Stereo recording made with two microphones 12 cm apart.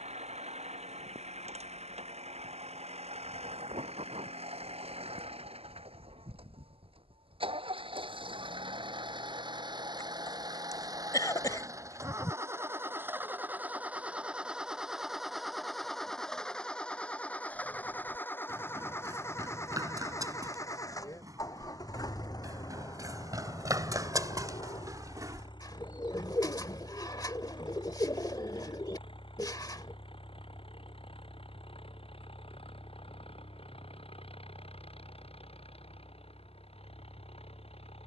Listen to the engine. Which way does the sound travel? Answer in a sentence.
In this clip you hear the engine move from right to left.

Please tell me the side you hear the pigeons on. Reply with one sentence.
You can hear the pigeons on the left.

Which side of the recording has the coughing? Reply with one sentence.
You can hear the coughing on the left.